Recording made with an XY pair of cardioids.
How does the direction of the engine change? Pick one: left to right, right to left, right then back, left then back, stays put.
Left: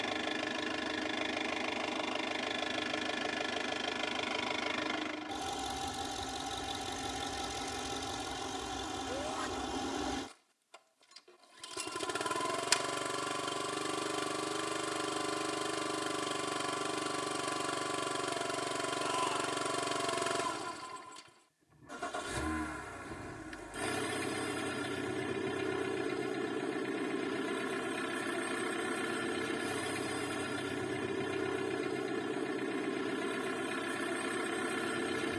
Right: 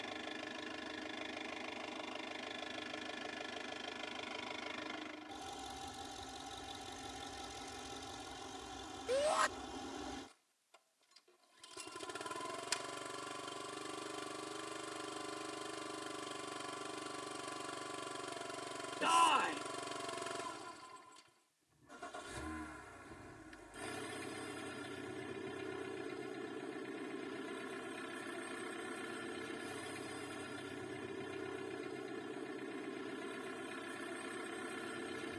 stays put.